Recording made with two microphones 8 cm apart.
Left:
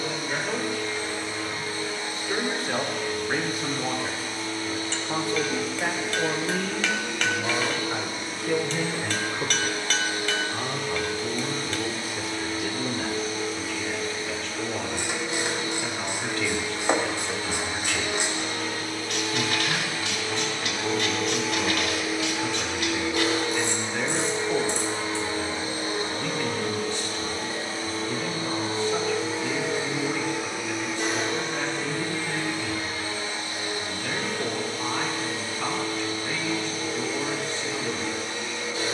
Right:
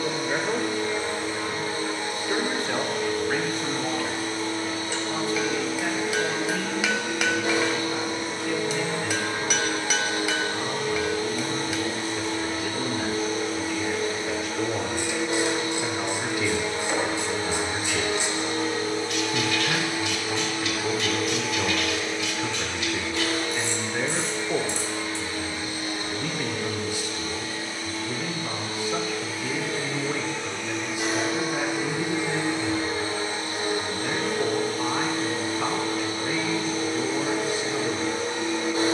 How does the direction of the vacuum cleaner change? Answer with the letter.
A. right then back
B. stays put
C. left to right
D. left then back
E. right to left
D.